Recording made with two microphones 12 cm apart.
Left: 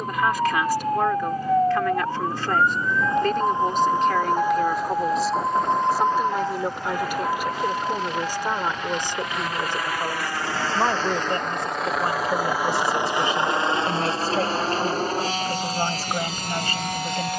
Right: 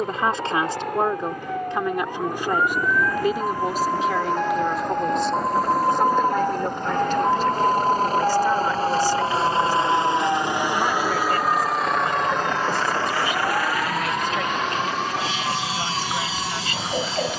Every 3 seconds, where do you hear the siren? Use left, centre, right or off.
left, centre, right, right, right, right.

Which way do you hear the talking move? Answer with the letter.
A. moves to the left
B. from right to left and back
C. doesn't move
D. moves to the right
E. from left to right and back
A.